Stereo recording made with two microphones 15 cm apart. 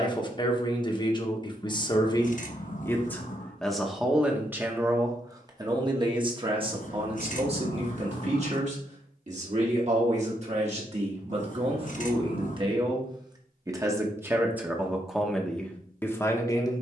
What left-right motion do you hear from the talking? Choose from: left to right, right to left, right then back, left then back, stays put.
right then back.